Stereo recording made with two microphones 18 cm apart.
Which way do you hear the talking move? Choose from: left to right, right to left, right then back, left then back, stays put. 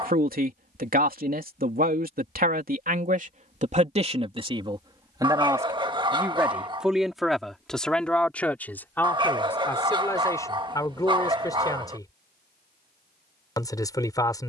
right to left.